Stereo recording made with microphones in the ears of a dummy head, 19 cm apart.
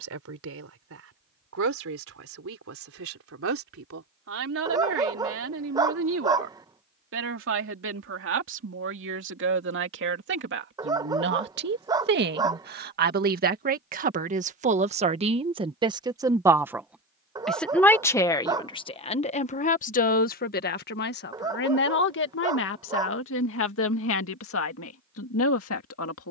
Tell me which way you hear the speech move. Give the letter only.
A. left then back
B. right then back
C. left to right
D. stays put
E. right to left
E.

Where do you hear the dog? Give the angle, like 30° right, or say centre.
20° right.